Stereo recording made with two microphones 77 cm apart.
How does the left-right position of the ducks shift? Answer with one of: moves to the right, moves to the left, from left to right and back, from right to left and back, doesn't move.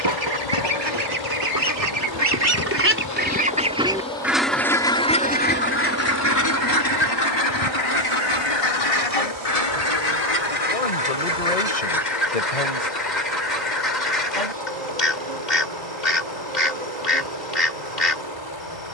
moves to the left.